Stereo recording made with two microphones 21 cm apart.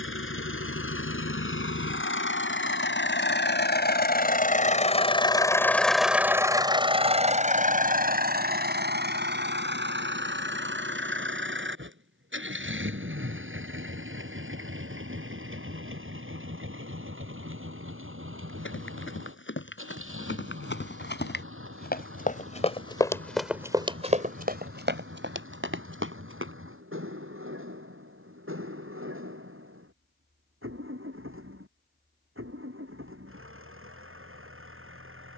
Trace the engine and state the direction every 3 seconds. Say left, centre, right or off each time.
left, left, right, right, right, right, right, right, right, right, right, right.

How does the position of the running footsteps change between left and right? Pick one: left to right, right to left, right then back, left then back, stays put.
left to right.